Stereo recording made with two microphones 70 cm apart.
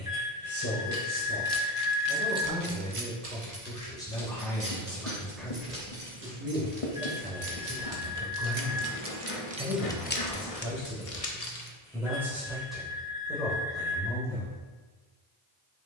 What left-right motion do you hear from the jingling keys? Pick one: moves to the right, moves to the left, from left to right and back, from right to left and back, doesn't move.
from left to right and back.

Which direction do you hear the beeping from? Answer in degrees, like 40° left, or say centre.
10° left.